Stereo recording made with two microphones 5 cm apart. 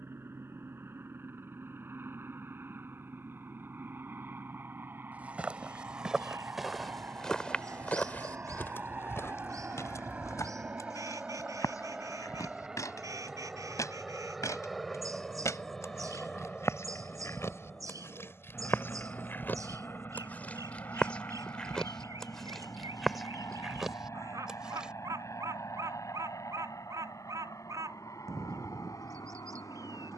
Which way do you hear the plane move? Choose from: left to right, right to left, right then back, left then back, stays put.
right to left.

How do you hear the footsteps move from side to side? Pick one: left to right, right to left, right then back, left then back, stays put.
left then back.